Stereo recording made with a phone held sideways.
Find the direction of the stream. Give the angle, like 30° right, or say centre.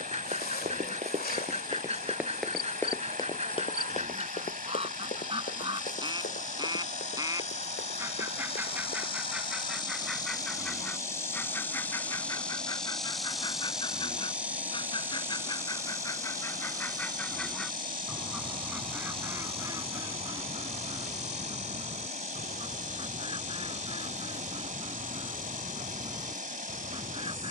60° right.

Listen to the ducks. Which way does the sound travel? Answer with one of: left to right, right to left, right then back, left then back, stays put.
left then back.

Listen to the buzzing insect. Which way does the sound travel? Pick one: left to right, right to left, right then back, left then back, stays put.
left to right.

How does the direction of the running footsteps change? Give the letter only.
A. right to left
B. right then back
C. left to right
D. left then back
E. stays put
A.